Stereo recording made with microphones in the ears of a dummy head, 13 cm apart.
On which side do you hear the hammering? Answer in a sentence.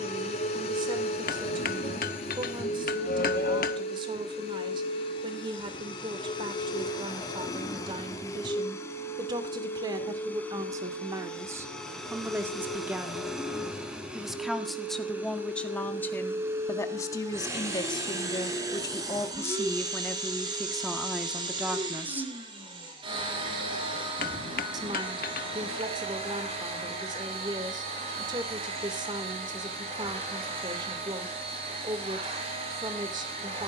You can hear the hammering on the left.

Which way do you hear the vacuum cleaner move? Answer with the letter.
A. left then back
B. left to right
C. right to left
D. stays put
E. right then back
B.